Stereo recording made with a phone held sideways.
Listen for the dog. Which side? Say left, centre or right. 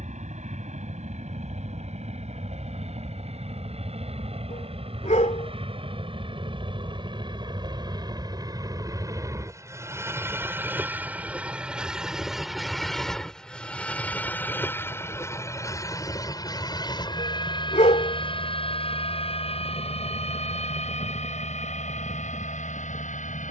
left.